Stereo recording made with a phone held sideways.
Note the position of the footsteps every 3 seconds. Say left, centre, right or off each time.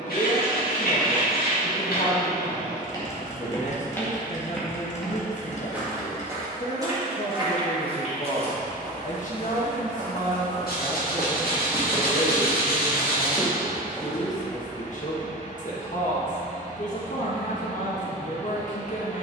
left, centre, right, right, centre, off, off.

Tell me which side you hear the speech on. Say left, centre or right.
left.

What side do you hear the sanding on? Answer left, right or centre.
left.